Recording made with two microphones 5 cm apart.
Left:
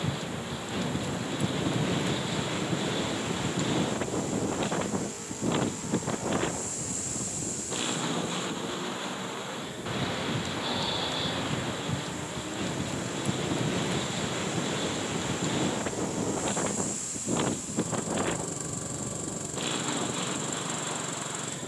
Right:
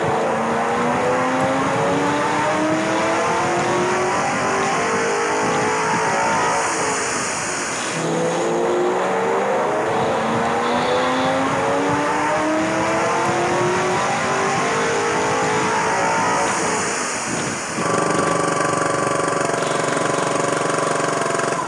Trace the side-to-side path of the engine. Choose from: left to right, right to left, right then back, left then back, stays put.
stays put.